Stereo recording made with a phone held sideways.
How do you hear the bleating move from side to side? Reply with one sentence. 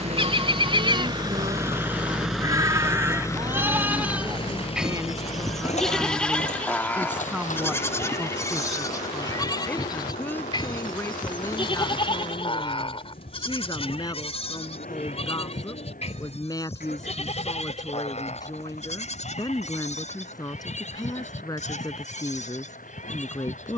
In this clip you hear the bleating move to the left.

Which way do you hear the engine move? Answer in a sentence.
In this clip you hear the engine travel towards the left.